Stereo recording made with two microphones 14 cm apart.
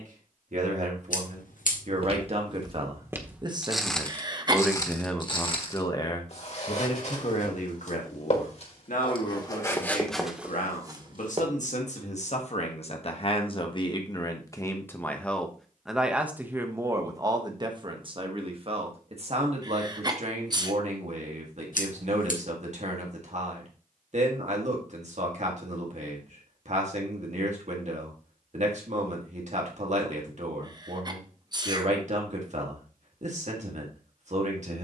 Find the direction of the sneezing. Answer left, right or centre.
right.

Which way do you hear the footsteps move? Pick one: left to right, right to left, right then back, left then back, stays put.
left then back.